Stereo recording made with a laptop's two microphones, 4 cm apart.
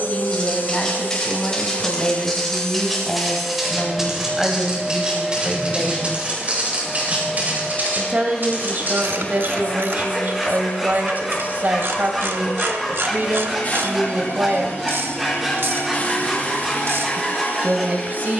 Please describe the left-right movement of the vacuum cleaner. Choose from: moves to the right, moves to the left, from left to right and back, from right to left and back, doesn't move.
from left to right and back.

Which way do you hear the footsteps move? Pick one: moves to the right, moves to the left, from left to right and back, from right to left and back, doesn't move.
moves to the right.